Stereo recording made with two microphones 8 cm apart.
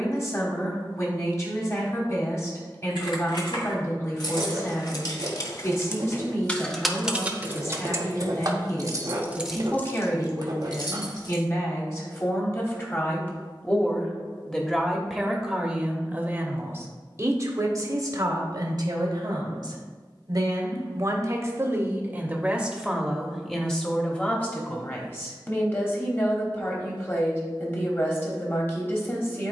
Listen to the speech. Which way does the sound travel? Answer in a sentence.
You can hear the speech go right and come back.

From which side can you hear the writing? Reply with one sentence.
You can hear the writing on the right.